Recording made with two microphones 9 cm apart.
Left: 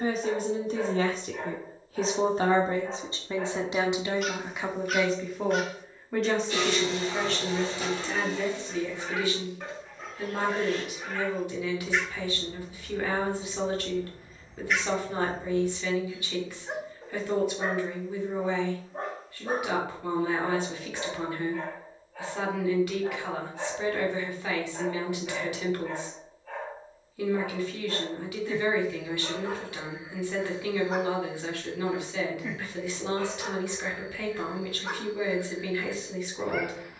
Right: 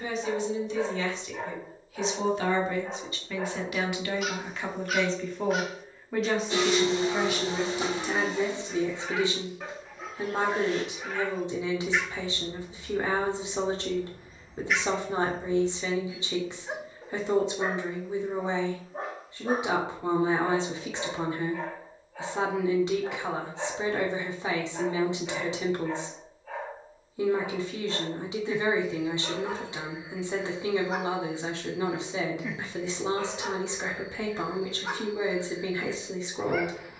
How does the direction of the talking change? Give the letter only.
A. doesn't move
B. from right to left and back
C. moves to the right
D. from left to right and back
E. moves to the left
C.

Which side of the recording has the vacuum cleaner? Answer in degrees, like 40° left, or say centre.
20° right.